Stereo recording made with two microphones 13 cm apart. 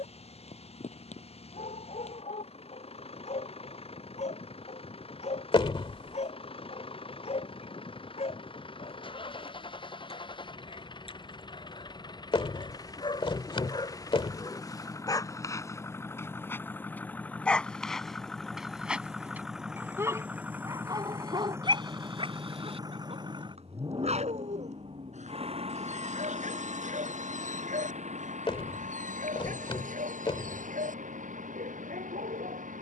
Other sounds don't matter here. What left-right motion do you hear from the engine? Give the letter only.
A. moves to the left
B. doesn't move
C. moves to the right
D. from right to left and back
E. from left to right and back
C.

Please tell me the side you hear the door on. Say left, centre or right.
left.